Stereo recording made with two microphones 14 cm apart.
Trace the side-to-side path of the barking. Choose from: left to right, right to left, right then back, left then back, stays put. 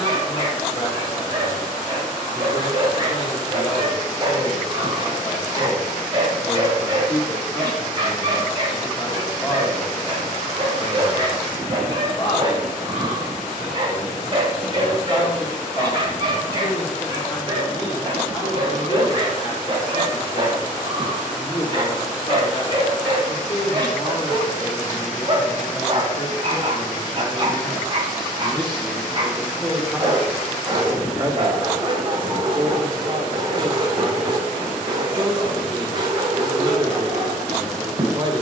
stays put.